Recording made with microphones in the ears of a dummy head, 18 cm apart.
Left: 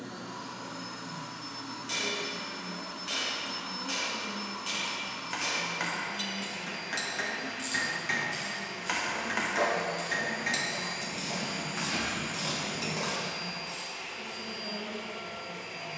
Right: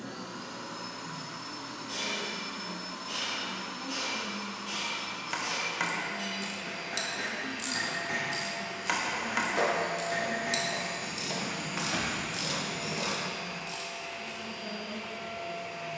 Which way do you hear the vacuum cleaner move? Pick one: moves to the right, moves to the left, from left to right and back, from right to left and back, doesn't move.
moves to the left.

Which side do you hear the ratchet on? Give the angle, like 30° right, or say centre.
10° right.